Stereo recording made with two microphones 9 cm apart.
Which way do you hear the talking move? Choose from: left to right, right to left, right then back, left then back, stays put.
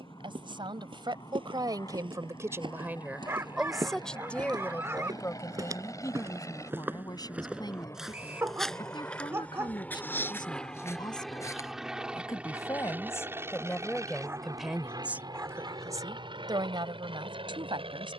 left then back.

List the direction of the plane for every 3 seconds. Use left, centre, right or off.
left, left, left, centre, right, right.